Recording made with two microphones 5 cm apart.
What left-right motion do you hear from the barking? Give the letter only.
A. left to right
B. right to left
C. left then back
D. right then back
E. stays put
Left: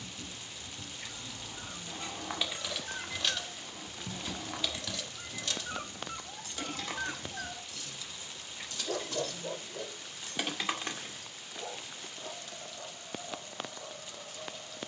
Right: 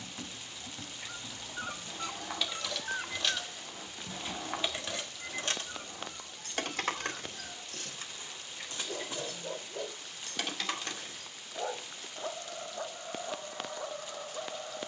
C.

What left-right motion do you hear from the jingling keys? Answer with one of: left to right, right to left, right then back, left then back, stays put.
right then back.